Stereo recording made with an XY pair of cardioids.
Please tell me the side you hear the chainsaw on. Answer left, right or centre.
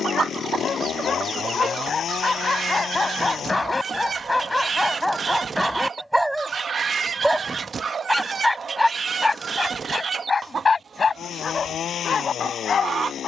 left.